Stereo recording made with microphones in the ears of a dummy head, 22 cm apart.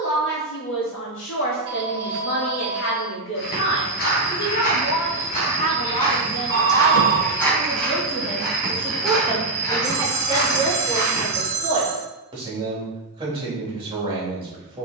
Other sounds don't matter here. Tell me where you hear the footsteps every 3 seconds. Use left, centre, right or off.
off, left, centre, left, off.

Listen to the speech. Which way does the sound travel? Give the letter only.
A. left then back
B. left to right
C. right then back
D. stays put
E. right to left
B.